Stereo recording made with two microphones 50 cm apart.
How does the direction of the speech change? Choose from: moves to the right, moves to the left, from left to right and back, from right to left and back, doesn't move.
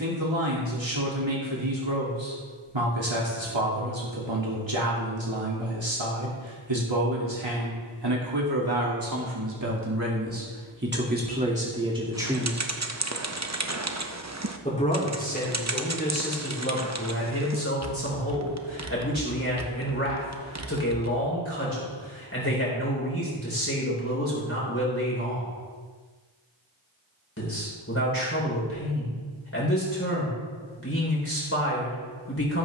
moves to the left.